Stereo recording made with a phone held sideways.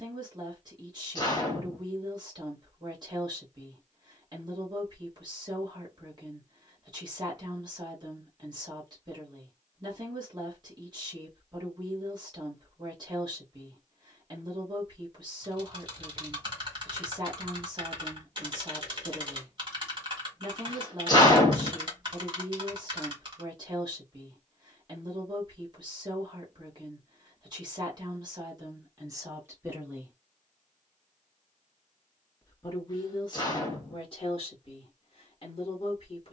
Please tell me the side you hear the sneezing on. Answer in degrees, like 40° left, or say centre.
30° left.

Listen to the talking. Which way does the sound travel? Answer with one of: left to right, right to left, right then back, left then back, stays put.
right to left.